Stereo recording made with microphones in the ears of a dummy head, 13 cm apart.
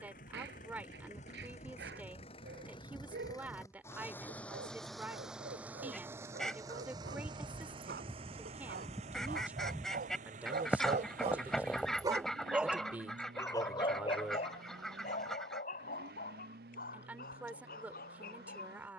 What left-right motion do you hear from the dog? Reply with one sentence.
You can hear the dog move from right to left.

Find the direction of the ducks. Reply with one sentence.
In this clip you hear the ducks in the centre.